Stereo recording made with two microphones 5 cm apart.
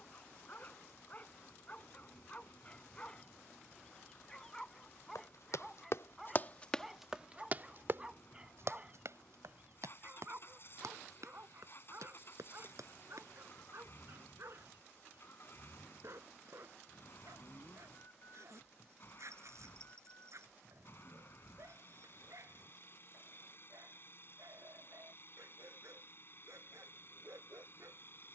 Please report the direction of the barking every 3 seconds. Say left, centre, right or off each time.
left, centre, centre, right, right, right, right, right, right, right.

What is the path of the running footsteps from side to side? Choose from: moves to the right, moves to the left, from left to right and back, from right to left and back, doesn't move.
moves to the right.